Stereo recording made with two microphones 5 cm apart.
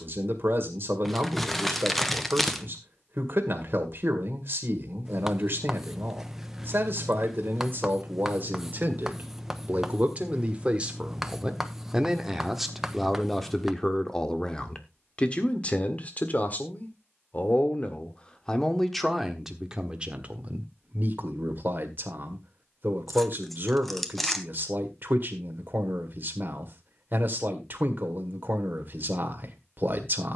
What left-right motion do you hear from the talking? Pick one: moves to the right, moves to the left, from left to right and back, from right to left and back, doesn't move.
from right to left and back.